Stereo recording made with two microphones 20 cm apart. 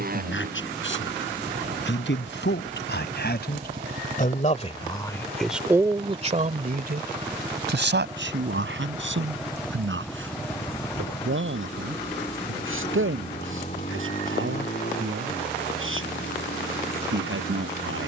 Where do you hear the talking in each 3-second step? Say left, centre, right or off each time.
left, left, right, right, right, right.